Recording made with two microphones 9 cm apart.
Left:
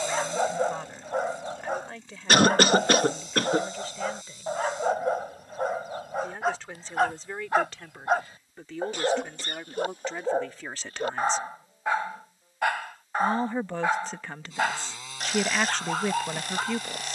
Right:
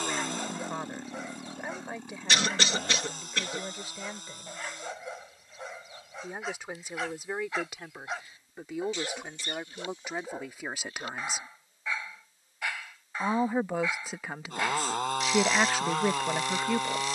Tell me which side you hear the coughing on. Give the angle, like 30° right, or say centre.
50° left.